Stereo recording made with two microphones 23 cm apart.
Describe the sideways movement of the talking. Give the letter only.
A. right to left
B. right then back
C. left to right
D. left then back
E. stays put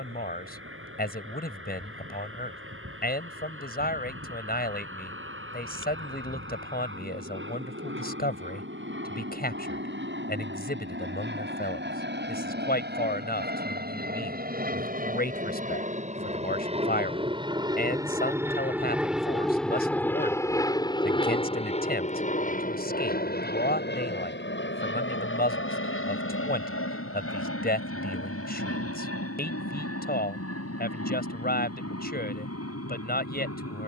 E.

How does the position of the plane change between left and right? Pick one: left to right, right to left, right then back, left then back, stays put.
right to left.